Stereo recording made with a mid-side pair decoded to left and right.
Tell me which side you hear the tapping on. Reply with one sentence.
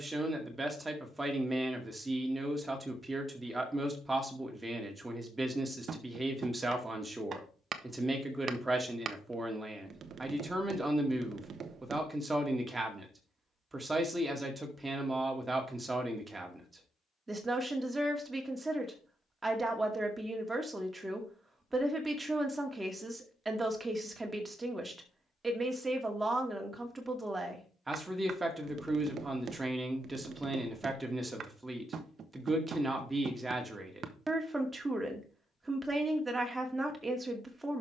You can hear the tapping on the right.